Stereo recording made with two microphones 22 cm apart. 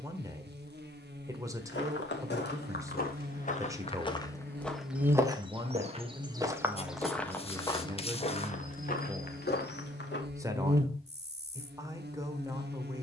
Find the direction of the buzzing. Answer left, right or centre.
right.